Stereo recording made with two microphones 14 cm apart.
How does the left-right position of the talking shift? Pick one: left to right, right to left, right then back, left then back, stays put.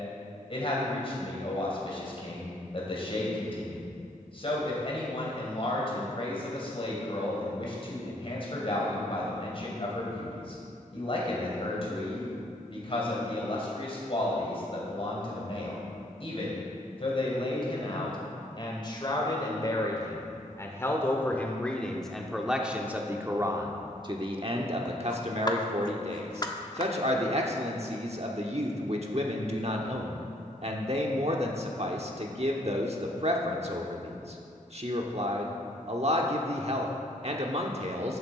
left to right.